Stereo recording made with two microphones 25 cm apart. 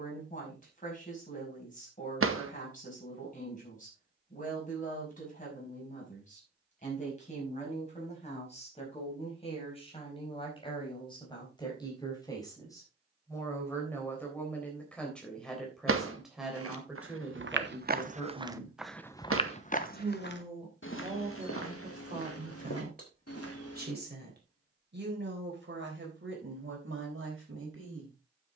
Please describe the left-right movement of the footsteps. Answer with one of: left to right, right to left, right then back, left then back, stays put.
right to left.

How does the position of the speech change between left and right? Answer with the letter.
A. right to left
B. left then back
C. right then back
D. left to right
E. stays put
D.